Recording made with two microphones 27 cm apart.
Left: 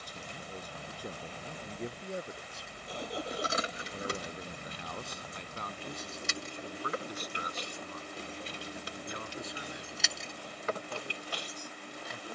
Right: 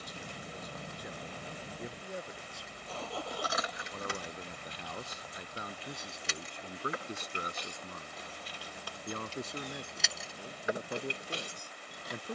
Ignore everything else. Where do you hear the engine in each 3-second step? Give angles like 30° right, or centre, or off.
10° right, 30° left, 50° left, 60° left.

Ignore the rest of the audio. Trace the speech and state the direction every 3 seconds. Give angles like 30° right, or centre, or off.
30° left, centre, 30° right, 60° right.